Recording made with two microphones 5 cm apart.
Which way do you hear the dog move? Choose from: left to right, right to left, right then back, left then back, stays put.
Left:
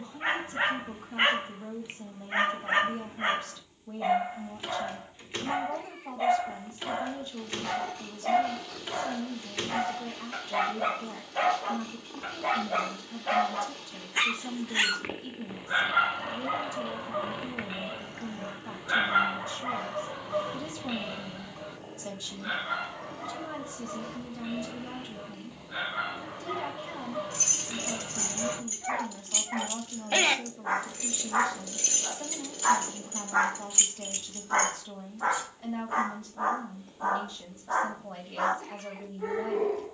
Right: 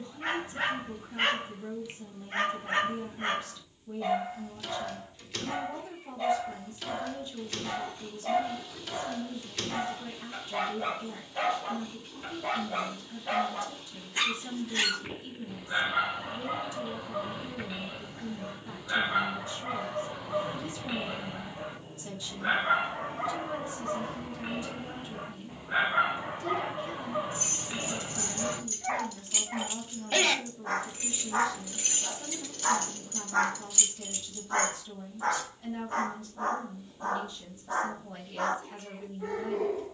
right then back.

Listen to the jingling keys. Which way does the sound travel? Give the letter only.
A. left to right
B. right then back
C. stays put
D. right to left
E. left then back
B.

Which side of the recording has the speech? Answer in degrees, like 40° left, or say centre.
40° left.